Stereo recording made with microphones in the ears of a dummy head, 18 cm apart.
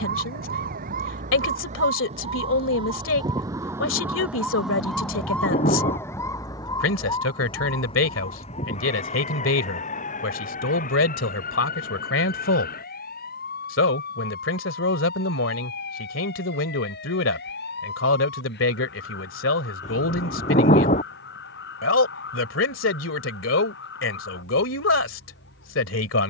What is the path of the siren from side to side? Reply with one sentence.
In this clip you hear the siren move from right to left.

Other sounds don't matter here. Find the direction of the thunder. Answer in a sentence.
You can hear the thunder on the left.